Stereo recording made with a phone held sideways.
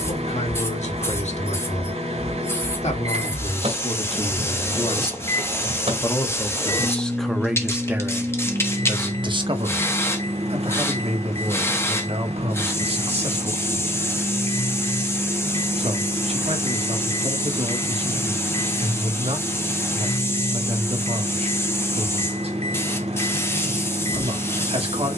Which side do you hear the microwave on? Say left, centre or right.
right.